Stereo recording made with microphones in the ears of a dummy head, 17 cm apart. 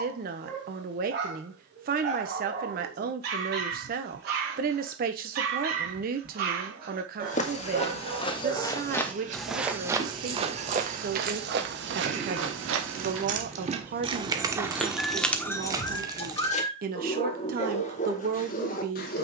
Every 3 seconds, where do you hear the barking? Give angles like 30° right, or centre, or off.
50° right, 50° right, 40° right, 30° right, 10° right, 20° left, 40° left.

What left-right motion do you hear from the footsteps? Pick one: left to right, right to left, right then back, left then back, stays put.
left to right.